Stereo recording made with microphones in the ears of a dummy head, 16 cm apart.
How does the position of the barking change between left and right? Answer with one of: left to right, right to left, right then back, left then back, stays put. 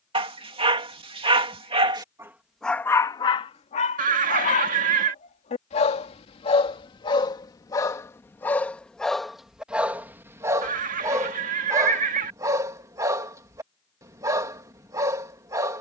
left then back.